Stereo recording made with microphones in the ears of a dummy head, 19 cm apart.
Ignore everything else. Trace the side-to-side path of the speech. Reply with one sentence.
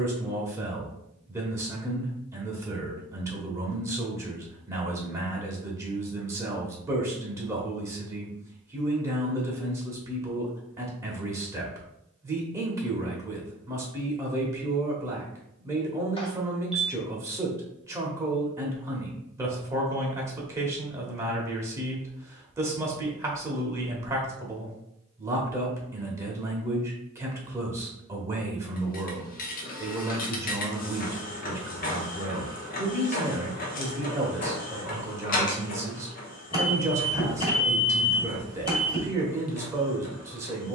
In this clip you hear the speech stay put.